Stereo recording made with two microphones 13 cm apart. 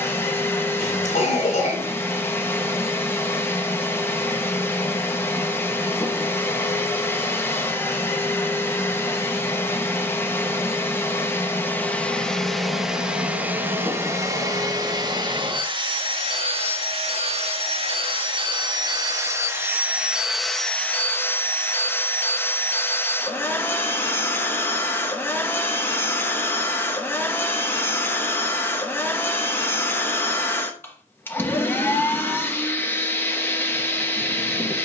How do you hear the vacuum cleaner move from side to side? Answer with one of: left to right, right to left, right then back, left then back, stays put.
right then back.